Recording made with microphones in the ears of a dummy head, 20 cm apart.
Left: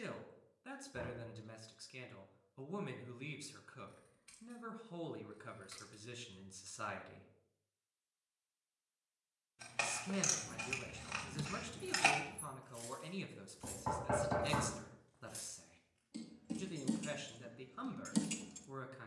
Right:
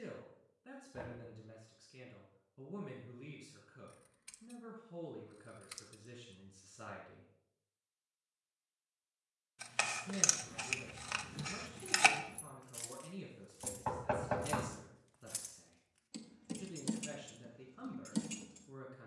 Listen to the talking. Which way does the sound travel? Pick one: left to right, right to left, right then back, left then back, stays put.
stays put.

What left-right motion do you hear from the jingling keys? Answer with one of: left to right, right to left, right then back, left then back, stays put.
right then back.